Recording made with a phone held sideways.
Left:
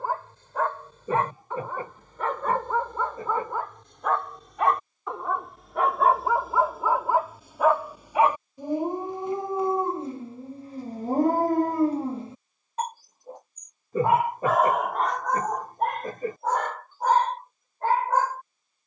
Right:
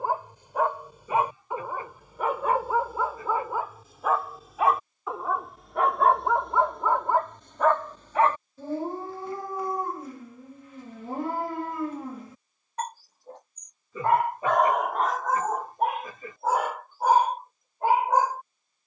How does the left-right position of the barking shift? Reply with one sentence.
You can hear the barking go left and come back.